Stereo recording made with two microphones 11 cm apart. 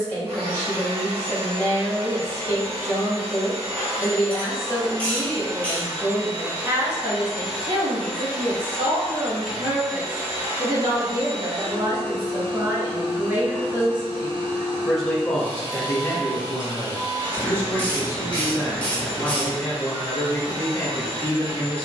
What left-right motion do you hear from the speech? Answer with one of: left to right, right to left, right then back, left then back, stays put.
right then back.